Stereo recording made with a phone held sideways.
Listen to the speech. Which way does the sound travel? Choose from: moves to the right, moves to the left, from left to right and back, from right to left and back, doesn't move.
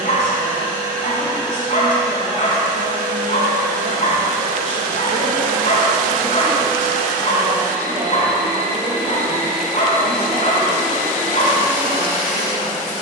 doesn't move.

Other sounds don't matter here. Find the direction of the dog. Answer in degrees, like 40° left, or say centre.
50° left.